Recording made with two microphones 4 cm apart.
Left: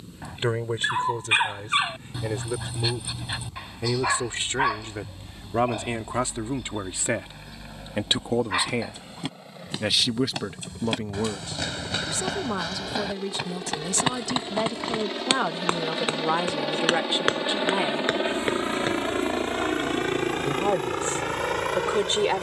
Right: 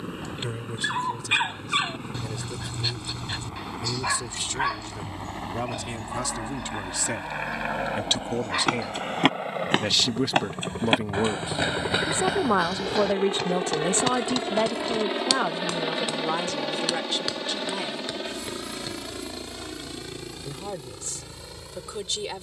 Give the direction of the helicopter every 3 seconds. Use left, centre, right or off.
right, right, right, right, right, centre, left, left.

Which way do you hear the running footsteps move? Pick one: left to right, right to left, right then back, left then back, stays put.
right to left.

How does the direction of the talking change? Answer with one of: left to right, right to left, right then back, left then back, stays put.
right then back.